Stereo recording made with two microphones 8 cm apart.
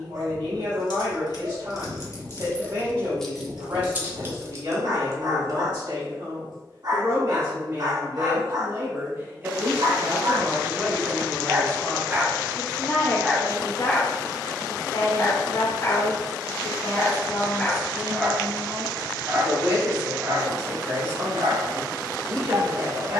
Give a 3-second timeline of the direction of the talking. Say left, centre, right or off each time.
right, right, right, centre, left, left, right, right.